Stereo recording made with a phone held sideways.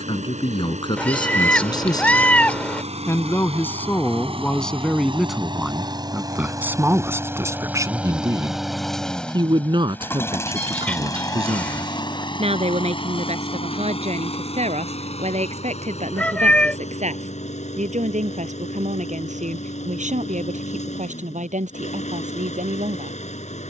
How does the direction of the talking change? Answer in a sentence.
In this clip you hear the talking move to the right.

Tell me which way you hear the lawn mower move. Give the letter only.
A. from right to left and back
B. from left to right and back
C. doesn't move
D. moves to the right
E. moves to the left
E.